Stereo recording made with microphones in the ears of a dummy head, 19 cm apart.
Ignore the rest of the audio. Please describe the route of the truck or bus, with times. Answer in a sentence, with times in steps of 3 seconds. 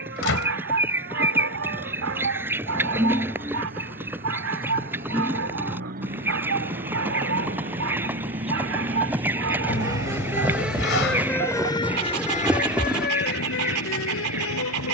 In this clip you hear the truck or bus on the right from 0 s, in the centre from 9 s and on the left from 12 s.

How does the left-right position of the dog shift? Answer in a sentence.
In this clip you hear the dog stay put.